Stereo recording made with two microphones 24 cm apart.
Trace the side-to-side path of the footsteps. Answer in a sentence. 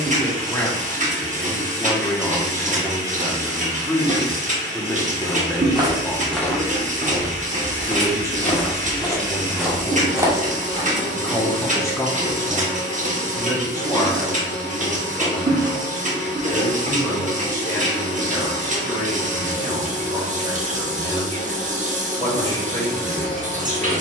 In this clip you hear the footsteps go left and come back.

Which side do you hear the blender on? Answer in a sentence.
In this clip you hear the blender on the left.